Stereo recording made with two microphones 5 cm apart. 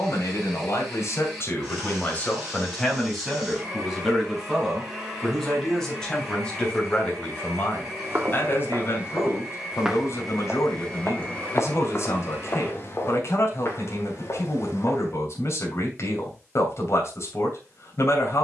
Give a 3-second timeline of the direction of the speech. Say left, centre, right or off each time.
left, centre, left, left, left, left.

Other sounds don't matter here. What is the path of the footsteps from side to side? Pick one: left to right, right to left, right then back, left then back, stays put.
right to left.